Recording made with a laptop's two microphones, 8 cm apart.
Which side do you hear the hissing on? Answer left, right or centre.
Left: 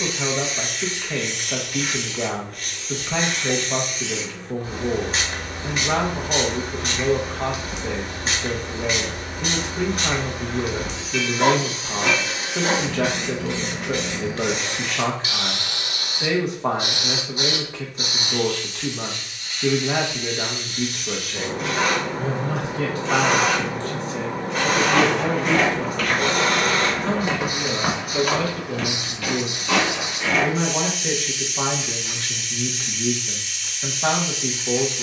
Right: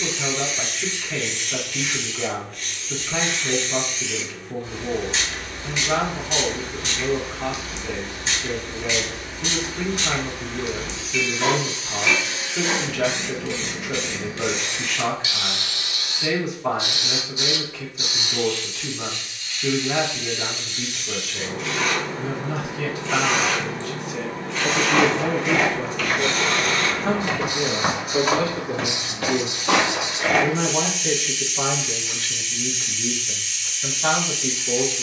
left.